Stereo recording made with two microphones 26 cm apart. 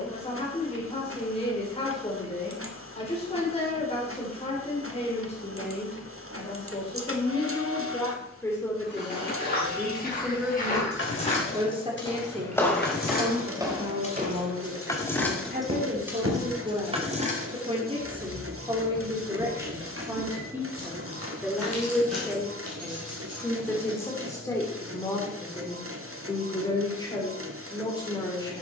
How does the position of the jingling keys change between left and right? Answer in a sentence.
In this clip you hear the jingling keys move to the right.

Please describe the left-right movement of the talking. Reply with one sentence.
You can hear the talking go right and come back.